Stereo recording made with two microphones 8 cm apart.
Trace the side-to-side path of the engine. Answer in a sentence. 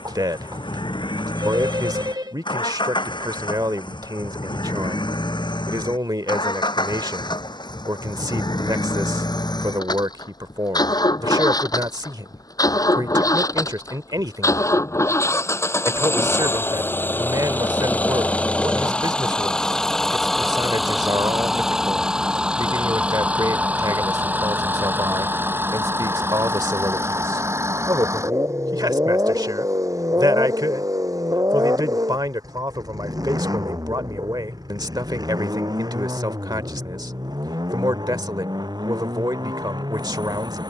In this clip you hear the engine travel towards the right.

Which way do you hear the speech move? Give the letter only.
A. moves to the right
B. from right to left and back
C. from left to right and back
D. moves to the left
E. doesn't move
E.